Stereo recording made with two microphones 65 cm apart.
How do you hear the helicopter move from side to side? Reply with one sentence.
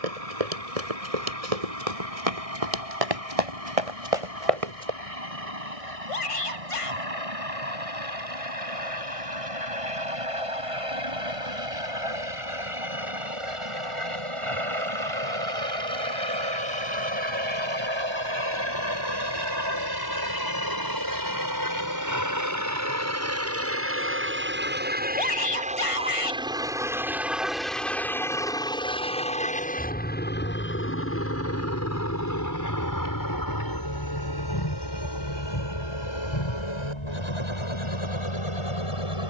You can hear the helicopter travel towards the left.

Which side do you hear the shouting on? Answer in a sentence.
In this clip you hear the shouting on the left.